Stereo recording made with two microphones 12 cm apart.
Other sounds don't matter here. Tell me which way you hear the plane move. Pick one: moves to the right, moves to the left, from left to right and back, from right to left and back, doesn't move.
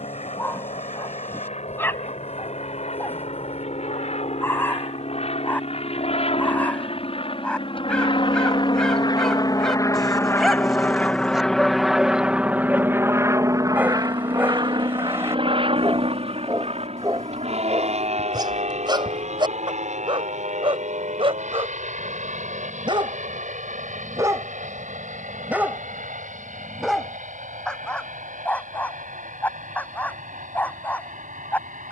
moves to the right.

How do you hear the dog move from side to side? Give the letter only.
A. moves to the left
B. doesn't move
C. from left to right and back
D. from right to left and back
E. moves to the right
C.